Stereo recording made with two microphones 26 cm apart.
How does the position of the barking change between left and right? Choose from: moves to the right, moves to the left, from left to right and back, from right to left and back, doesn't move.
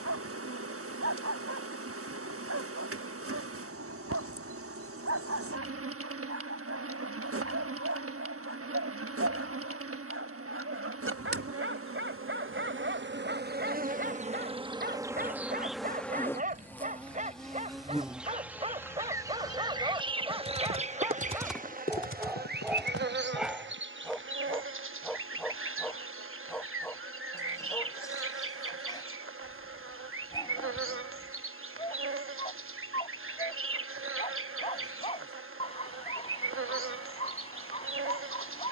moves to the left.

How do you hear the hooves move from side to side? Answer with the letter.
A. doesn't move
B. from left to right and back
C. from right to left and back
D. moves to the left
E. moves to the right
D.